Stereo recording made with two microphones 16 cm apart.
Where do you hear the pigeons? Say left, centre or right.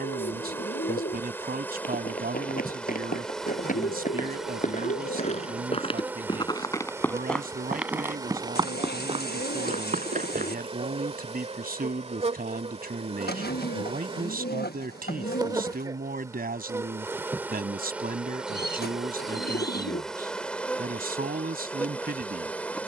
left.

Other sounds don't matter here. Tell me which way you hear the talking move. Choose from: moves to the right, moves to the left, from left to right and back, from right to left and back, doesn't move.
doesn't move.